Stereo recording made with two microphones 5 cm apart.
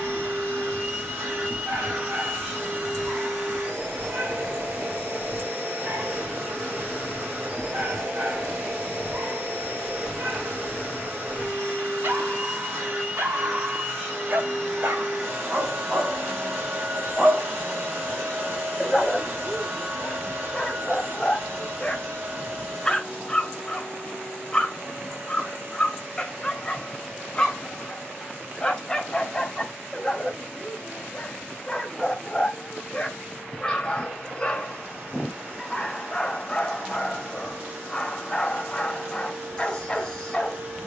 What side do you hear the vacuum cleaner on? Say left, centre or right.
right.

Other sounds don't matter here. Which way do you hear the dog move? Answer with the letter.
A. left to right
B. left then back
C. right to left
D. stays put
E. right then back
C.